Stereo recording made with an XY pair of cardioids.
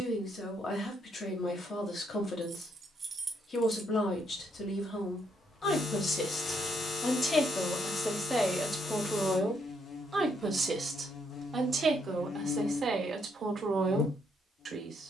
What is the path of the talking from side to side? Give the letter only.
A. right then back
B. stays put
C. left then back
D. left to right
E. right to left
D.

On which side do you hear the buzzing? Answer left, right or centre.
left.